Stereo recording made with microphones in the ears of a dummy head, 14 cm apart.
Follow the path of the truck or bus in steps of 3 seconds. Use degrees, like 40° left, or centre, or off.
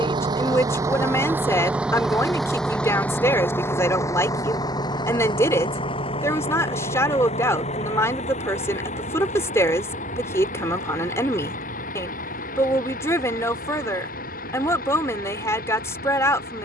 10° right, 20° left, 40° left, 50° left, 60° left, 60° left.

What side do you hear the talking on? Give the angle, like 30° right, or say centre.
20° left.